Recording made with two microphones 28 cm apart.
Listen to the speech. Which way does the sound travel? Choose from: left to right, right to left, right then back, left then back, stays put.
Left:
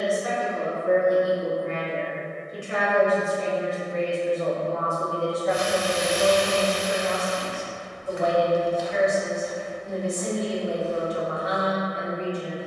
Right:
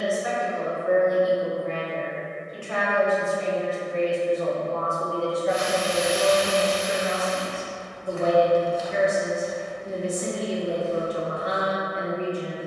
left to right.